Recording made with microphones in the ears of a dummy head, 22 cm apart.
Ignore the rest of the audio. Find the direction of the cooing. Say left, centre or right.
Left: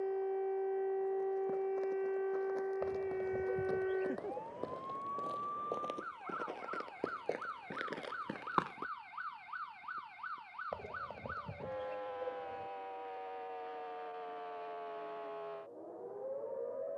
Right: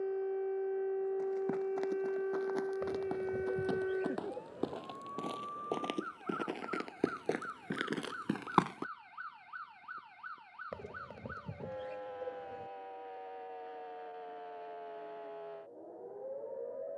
right.